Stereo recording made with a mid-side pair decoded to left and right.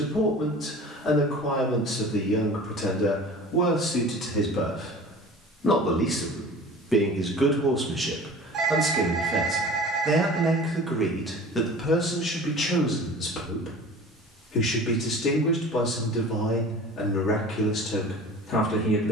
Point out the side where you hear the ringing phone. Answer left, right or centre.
right.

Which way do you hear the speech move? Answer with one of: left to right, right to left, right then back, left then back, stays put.
right then back.